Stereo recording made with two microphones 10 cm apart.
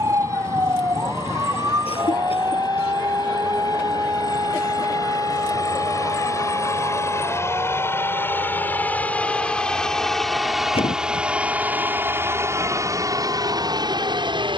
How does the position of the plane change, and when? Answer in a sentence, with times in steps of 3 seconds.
You can hear the plane on the left from 0 s, in the centre from 9 s and on the right from 12 s.